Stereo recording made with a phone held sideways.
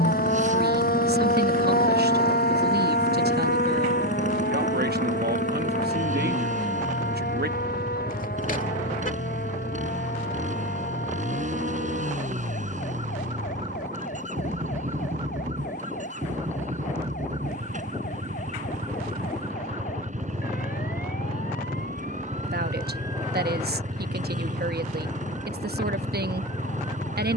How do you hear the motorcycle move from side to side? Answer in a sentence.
In this clip you hear the motorcycle stay in one place.